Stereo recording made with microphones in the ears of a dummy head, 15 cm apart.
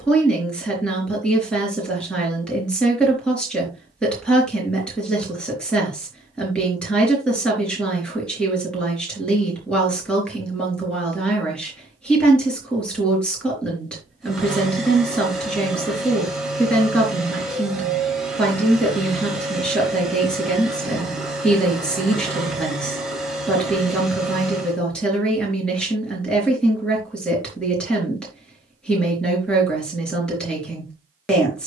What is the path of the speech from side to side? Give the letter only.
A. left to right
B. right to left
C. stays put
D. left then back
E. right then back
C.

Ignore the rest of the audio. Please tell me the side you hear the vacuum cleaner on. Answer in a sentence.
In this clip you hear the vacuum cleaner in the centre.